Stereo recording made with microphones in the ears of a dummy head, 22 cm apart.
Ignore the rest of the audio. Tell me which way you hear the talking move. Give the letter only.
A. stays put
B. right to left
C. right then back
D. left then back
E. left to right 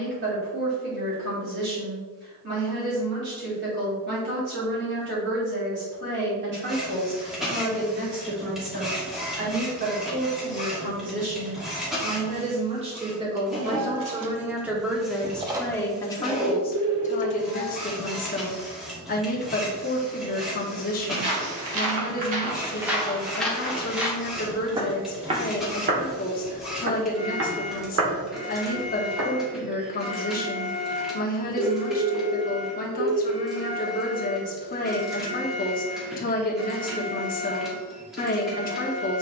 B.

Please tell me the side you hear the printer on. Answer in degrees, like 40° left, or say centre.
centre.